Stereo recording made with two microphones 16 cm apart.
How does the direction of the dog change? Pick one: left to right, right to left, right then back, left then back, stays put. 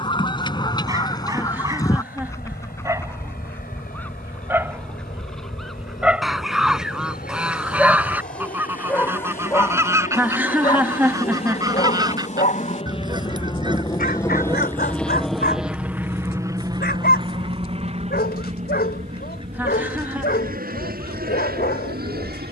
right to left.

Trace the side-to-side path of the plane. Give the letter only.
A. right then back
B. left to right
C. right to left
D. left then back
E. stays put
B.